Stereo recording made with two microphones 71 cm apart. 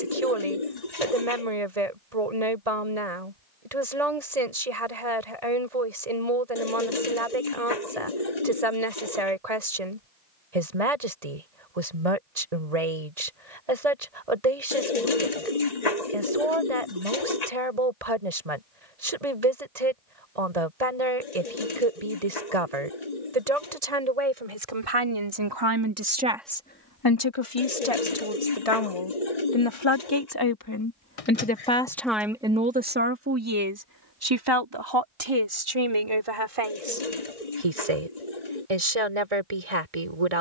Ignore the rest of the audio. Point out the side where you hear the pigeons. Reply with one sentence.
You can hear the pigeons on the left.